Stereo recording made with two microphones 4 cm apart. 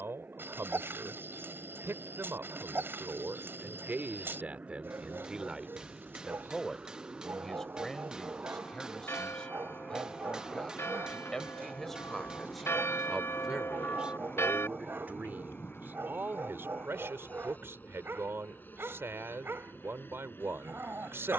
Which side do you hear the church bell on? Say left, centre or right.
left.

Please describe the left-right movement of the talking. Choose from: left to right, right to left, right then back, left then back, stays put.
left then back.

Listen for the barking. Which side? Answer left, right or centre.
right.